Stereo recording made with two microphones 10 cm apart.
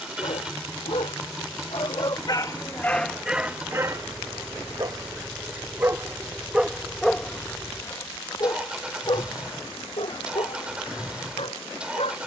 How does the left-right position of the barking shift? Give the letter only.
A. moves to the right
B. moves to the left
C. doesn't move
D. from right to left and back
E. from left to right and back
E.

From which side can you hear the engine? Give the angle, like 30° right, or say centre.
10° right.